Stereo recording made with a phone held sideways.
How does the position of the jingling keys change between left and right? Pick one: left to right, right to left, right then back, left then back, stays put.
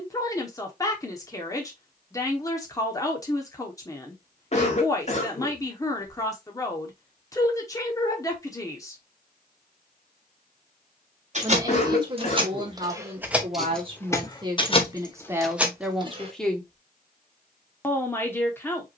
left then back.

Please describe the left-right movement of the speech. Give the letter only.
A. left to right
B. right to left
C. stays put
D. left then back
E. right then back
E.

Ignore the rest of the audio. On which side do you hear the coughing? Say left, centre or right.
left.